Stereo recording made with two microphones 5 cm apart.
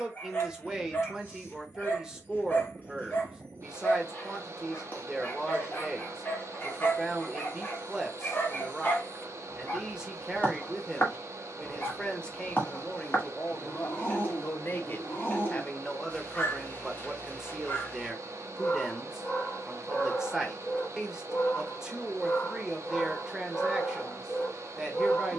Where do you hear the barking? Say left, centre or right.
left.